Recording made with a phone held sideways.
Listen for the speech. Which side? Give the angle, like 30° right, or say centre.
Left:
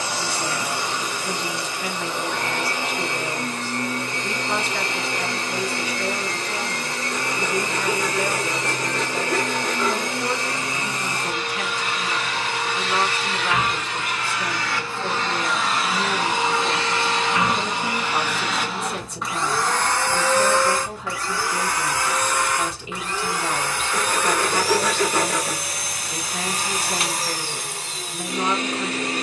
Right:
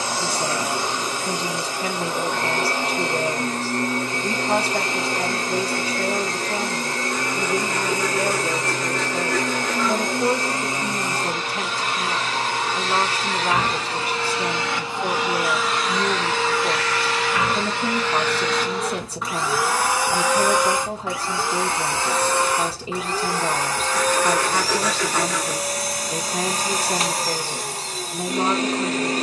40° right.